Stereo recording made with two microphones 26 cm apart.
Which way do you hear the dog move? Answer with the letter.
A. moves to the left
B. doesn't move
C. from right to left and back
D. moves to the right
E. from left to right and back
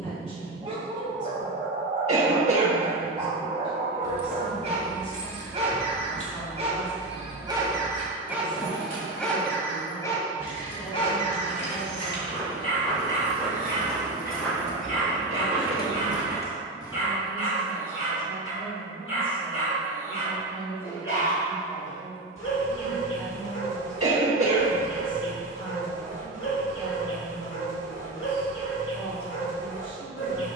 A.